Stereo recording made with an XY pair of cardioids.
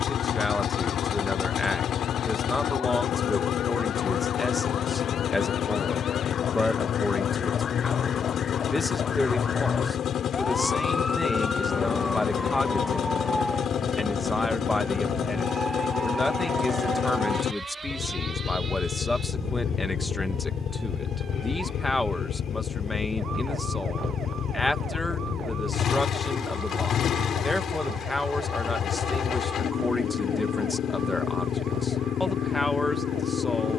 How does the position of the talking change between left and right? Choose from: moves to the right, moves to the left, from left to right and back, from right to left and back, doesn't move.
doesn't move.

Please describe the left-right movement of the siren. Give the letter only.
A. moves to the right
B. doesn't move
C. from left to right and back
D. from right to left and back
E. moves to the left
A.